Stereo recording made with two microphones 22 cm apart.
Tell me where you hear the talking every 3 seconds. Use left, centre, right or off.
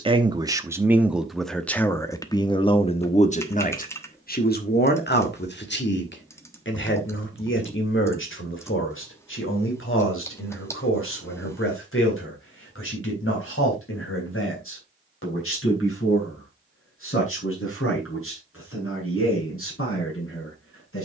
centre, left, left, left, left, left, left.